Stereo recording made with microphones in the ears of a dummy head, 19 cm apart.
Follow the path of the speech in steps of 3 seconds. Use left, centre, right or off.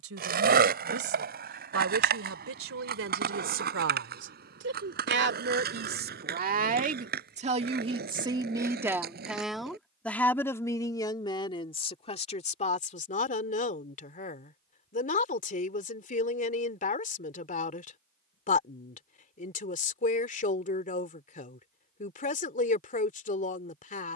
right, right, right, centre, left, left, left, left.